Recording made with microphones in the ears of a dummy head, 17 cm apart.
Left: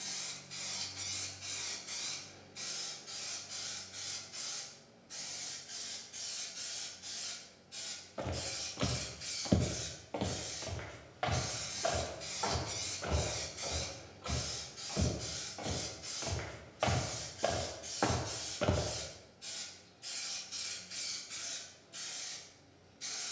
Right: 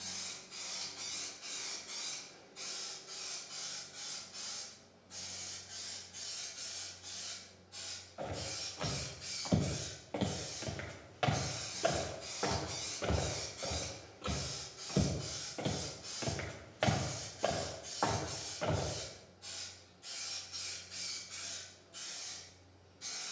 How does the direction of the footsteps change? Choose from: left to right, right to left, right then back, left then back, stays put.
right then back.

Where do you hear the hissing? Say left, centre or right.
left.